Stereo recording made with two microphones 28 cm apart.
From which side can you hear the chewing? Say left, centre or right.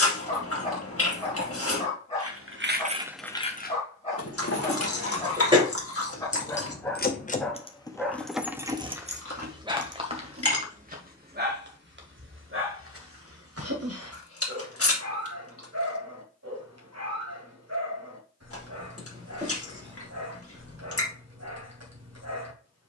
left.